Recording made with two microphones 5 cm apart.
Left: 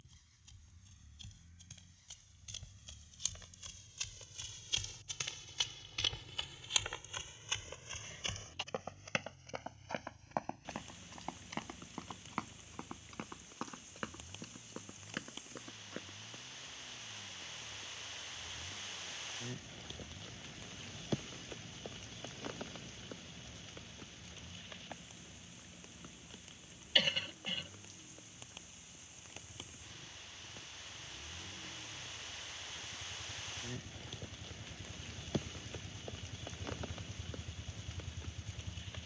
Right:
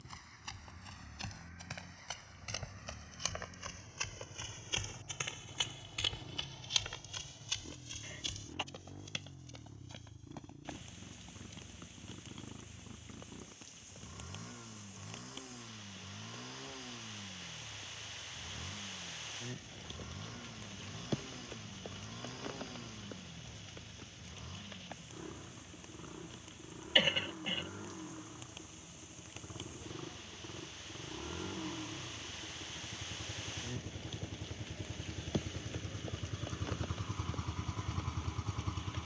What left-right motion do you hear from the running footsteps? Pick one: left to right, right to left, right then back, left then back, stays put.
right to left.